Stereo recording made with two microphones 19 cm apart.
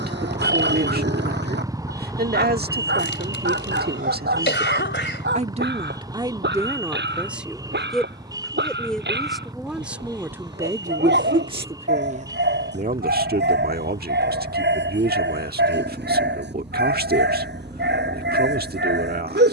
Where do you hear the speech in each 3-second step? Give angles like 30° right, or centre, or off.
60° right, 50° right, 10° right, 10° right, 50° right, 60° right, 60° right.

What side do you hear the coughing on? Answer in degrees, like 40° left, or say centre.
70° left.